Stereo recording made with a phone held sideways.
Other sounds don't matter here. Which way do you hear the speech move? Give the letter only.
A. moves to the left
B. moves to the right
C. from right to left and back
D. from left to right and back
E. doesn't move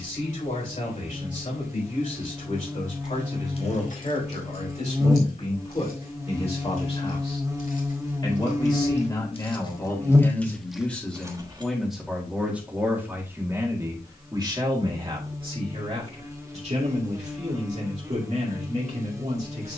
B.